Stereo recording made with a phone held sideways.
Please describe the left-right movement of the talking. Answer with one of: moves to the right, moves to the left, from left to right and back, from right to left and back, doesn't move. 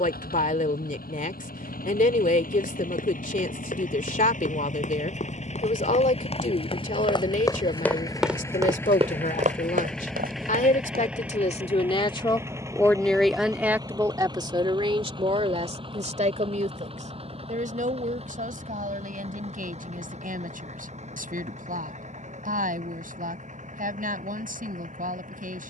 moves to the right.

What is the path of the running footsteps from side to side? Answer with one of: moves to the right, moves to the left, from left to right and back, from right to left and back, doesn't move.
moves to the right.